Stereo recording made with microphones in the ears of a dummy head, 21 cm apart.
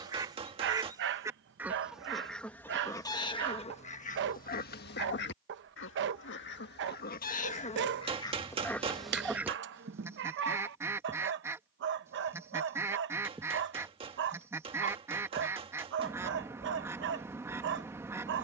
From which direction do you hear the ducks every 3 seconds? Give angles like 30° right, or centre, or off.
10° right, 40° left, 30° left, 10° right, 10° right, 10° right.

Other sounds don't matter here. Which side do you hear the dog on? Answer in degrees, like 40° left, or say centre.
50° right.